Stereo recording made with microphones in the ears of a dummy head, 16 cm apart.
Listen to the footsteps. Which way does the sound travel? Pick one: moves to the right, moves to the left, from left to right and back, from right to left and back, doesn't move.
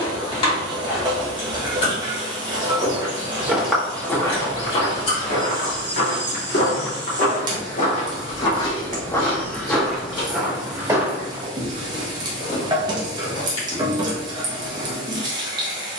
from right to left and back.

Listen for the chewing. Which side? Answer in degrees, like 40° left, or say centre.
30° left.